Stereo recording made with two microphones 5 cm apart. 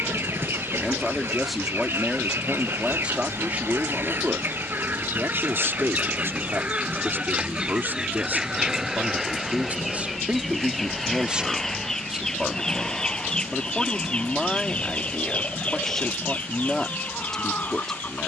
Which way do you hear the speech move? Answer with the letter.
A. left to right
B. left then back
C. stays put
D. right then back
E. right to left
D.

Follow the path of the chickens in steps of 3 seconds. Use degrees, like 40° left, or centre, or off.
50° right, 40° right, 20° right, centre, 20° left, 30° left.